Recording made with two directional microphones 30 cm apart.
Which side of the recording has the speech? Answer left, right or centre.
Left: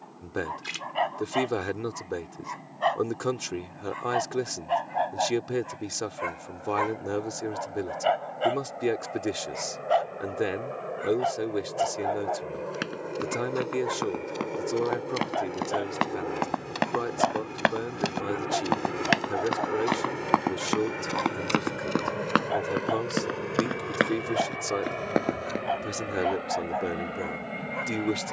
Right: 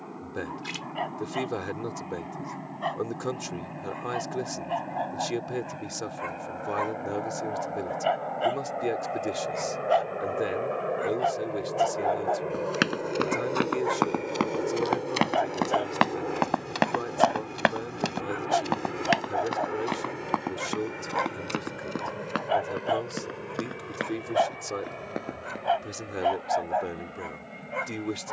left.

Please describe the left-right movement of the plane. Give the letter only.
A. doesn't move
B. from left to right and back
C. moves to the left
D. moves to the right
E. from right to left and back
C.